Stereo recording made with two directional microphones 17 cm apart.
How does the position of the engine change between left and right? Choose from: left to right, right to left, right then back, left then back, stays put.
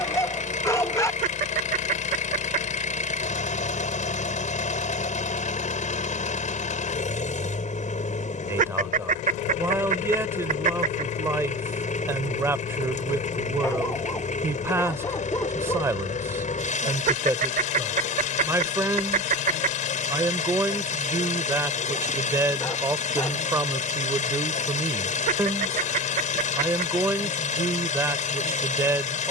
stays put.